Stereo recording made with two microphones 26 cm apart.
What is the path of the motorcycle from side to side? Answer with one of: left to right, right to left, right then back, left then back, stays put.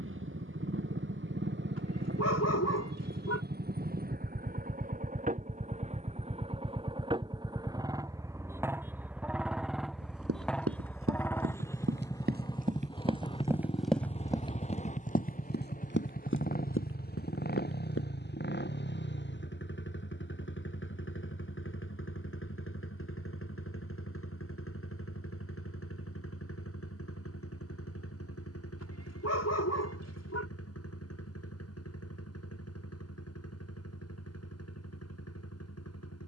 right to left.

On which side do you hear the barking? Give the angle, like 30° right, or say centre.
70° left.